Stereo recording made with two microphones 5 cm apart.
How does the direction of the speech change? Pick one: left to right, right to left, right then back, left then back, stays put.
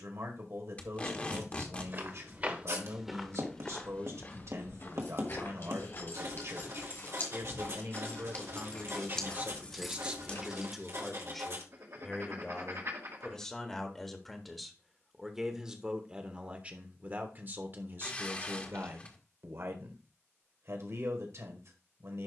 left then back.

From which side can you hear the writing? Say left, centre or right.
right.